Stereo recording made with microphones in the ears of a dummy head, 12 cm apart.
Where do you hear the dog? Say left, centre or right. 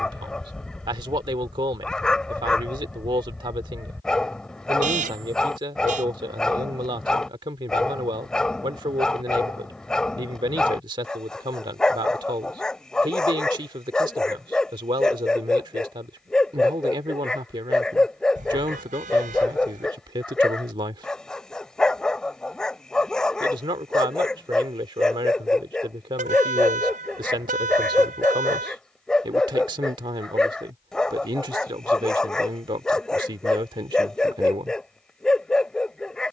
centre.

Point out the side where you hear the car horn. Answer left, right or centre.
right.